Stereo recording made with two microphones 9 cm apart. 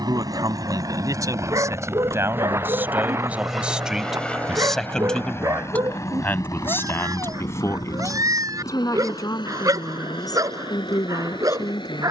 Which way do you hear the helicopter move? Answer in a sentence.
In this clip you hear the helicopter move from right to left.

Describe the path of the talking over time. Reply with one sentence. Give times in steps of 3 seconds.
In this clip you hear the talking on the right from 0 s, in the centre from 3 s and on the left from 6 s.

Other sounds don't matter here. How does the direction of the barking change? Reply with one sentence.
You can hear the barking stay put.